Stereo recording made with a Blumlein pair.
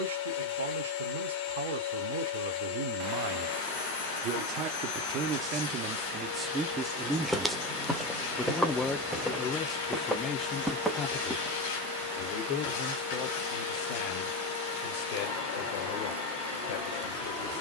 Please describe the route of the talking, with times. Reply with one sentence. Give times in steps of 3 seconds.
In this clip you hear the talking on the right from 0 s, in the centre from 6 s and on the left from 9 s.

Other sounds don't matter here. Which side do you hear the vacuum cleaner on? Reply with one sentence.
In this clip you hear the vacuum cleaner on the left.